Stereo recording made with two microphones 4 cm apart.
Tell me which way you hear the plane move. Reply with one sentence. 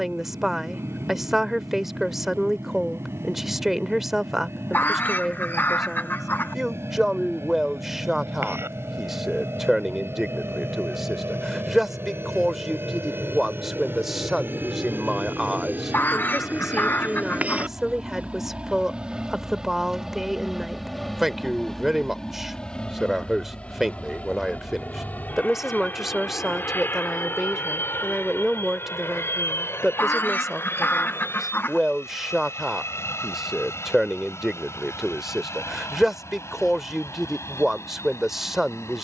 You can hear the plane move to the left.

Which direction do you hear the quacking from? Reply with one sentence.
In this clip you hear the quacking on the left.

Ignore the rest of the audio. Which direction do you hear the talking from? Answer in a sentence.
In this clip you hear the talking in the centre.